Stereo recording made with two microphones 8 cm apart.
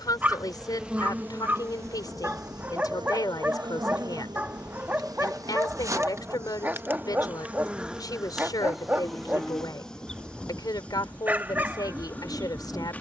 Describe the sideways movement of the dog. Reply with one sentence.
In this clip you hear the dog stay put.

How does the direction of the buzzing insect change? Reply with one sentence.
You can hear the buzzing insect move from left to right and back again.